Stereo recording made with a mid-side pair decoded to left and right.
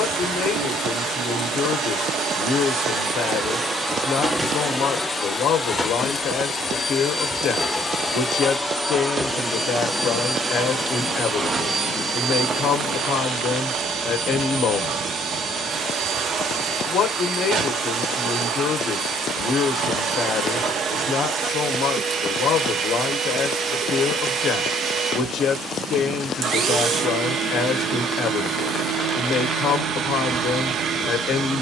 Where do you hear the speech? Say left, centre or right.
left.